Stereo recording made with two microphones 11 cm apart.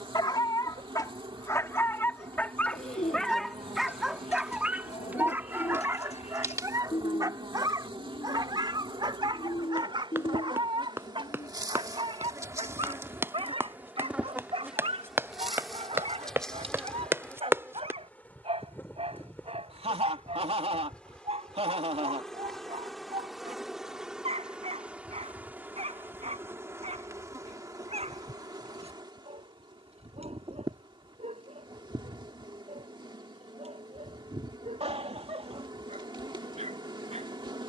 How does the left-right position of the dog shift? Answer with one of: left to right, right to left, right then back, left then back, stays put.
left to right.